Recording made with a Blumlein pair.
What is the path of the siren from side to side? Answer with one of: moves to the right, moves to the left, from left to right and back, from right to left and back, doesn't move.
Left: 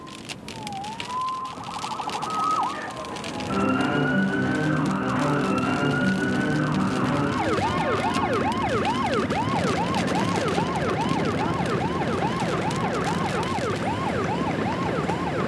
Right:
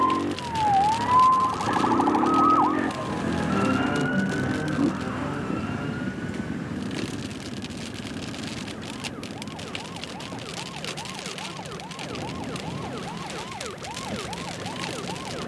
moves to the left.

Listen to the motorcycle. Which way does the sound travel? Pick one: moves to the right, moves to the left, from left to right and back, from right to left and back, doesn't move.
moves to the left.